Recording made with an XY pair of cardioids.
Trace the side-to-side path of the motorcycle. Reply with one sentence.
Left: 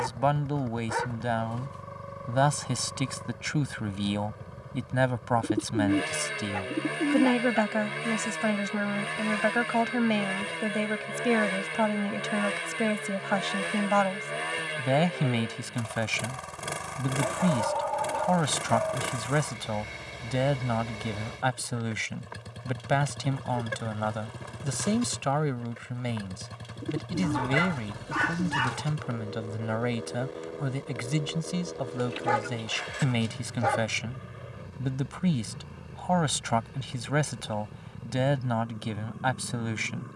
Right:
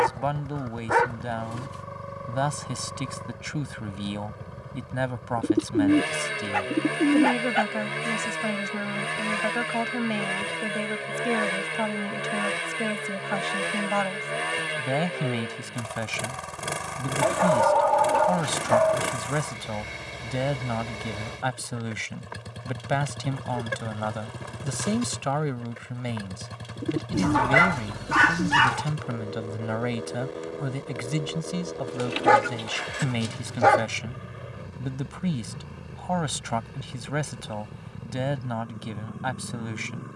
You can hear the motorcycle stay in one place.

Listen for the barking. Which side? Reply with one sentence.
In this clip you hear the barking on the right.